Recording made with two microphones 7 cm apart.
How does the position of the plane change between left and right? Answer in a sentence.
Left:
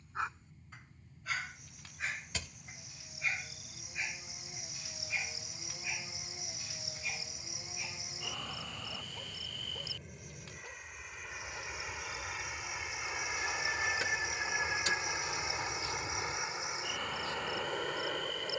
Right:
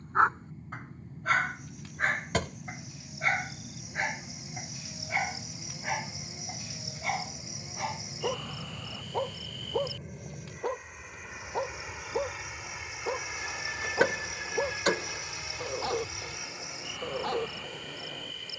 You can hear the plane go from the right side to the left.